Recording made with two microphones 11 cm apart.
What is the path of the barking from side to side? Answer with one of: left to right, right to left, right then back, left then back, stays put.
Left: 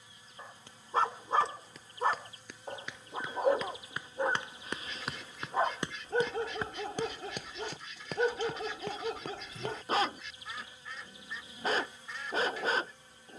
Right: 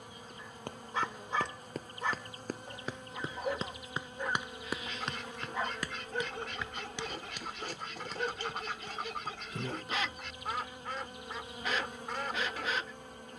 stays put.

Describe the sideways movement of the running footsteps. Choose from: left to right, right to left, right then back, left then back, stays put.
right to left.